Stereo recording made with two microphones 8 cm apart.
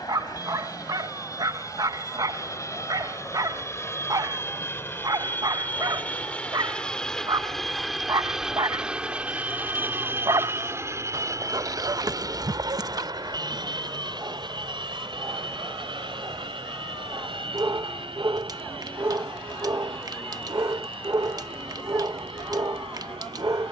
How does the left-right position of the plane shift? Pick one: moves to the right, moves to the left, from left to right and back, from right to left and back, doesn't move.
moves to the right.